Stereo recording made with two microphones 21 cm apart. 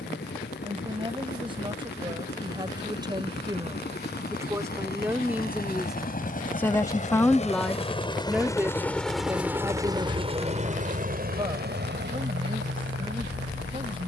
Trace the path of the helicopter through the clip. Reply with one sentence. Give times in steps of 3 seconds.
In this clip you hear the helicopter on the left from 0 s and on the right from 9 s.